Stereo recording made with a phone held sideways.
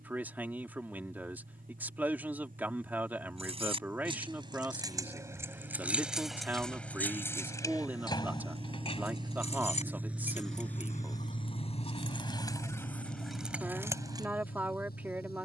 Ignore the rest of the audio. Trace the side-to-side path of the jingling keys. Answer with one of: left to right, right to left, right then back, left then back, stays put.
left then back.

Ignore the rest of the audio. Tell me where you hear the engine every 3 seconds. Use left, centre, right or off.
right, right, right, centre, left.